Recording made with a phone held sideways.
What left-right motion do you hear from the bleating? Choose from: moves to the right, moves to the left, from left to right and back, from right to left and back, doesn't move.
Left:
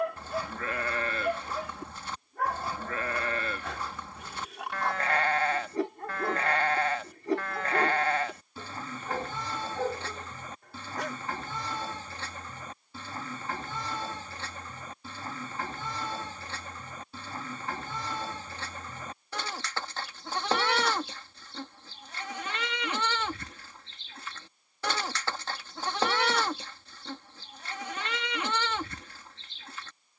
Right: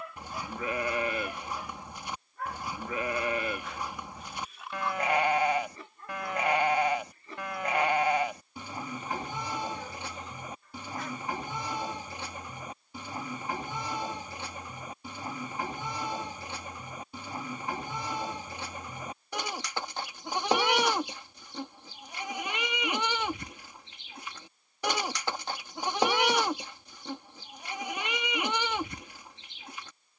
doesn't move.